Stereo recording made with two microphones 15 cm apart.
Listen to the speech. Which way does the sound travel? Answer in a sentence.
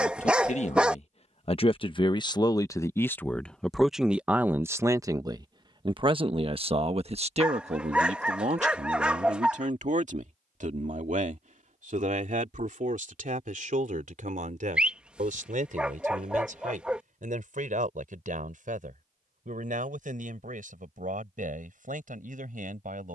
You can hear the speech go from the left side to the right.